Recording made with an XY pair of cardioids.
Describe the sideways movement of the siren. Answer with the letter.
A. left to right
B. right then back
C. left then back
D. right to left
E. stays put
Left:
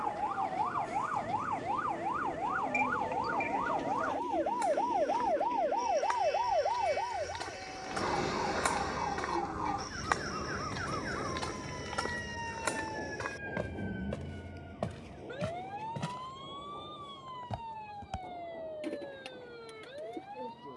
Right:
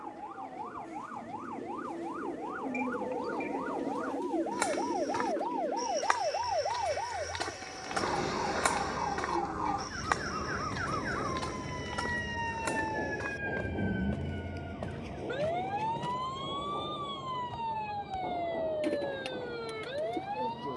A.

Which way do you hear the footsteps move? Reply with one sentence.
In this clip you hear the footsteps move to the left.